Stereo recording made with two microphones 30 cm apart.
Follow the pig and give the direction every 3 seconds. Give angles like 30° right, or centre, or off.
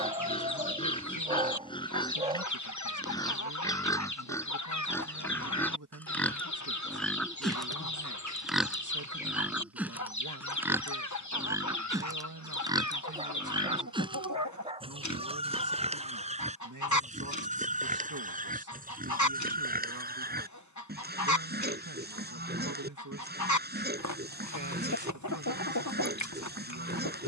20° left, 10° left, centre, 10° right, 10° right, 20° right, 30° right, 30° right, 30° right.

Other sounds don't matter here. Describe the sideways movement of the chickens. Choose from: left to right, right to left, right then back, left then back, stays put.
stays put.